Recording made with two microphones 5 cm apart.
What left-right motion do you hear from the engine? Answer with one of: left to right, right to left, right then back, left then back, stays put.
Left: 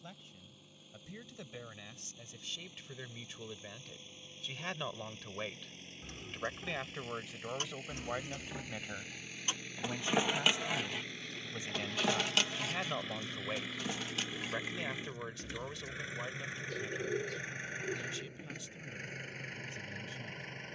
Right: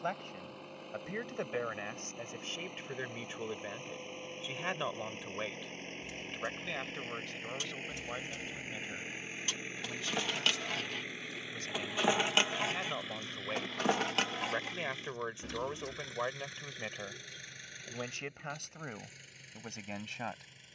right to left.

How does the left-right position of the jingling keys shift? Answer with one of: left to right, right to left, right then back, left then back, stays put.
left to right.